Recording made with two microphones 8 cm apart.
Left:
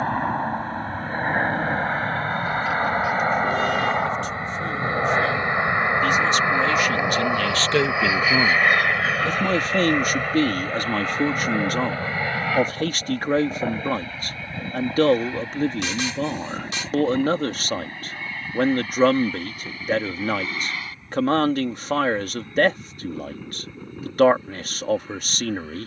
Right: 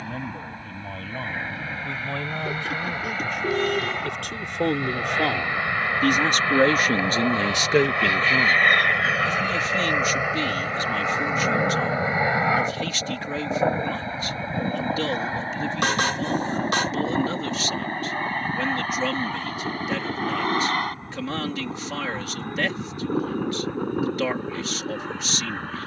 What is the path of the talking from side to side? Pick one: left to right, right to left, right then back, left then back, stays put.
right to left.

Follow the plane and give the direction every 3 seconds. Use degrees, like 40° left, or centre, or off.
50° left, 30° left, 10° left, 10° right, 30° right, 40° right, 40° right, 50° right, 50° right.